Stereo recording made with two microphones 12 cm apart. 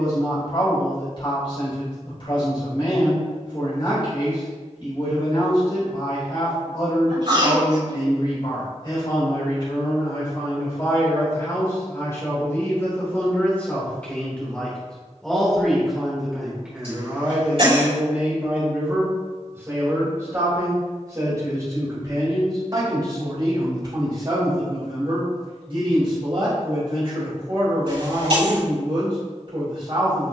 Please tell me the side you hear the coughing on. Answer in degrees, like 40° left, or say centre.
50° right.